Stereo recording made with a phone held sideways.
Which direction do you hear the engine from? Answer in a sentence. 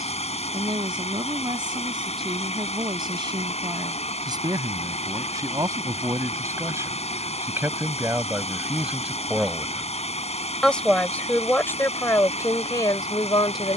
In this clip you hear the engine on the left.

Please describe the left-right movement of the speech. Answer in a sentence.
In this clip you hear the speech move to the left.